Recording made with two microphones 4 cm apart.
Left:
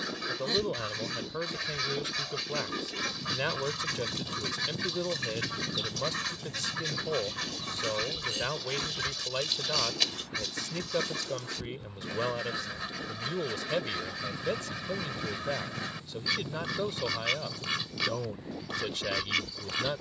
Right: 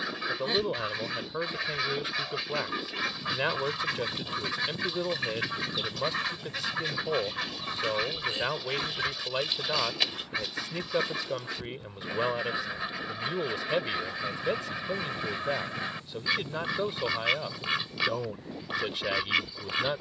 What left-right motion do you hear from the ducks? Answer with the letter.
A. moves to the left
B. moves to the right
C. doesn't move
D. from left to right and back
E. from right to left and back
C.